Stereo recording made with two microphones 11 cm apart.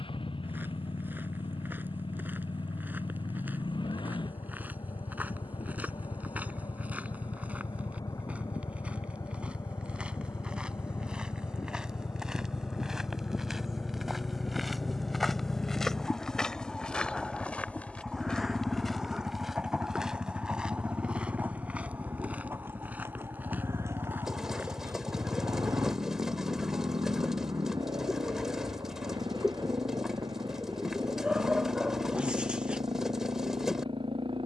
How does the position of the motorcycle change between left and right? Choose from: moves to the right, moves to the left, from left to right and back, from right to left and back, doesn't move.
moves to the right.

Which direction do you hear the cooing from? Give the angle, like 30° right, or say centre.
centre.